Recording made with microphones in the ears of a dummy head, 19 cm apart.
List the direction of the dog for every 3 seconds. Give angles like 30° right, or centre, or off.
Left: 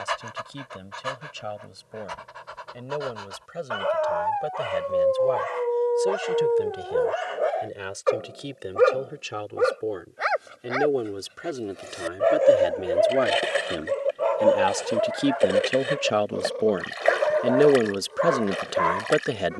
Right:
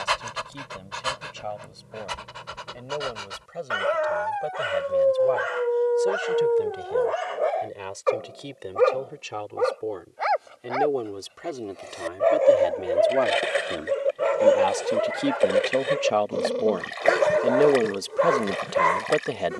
50° right, 20° right, centre, 20° left, 10° right, 50° right, 50° right.